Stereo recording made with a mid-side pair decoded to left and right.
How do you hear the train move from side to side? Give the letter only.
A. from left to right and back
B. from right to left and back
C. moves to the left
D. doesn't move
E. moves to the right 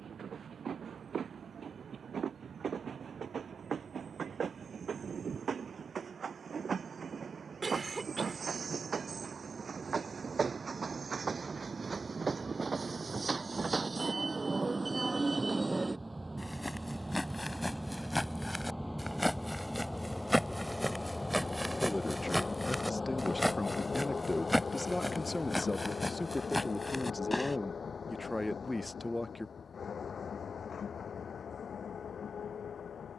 C.